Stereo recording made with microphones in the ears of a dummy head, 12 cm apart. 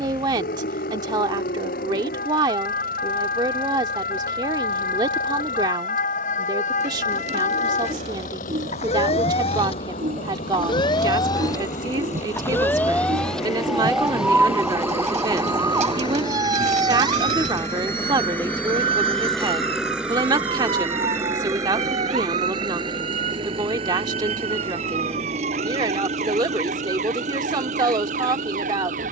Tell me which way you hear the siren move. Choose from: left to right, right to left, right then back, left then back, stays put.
left to right.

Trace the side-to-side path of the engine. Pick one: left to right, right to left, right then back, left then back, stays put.
left to right.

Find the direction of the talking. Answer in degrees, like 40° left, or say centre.
30° right.